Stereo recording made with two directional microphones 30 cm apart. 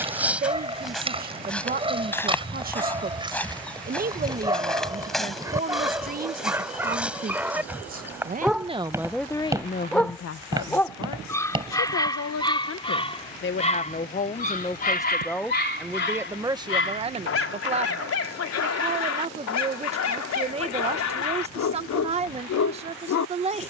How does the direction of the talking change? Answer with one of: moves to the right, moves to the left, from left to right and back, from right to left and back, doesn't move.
from right to left and back.